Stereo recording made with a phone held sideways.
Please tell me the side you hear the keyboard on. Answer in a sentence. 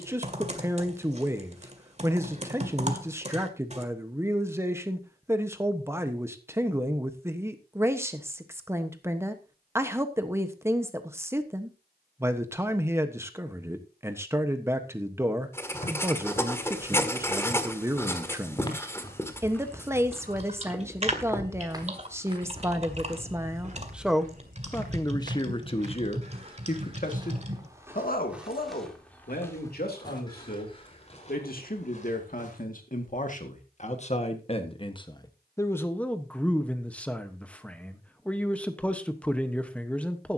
You can hear the keyboard on the right.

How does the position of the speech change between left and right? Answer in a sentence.
You can hear the speech go left and come back.